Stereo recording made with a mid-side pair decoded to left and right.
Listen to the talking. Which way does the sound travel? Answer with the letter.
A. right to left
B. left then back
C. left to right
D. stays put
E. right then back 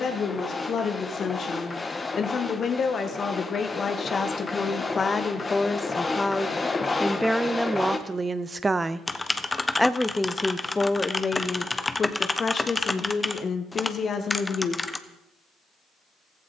E.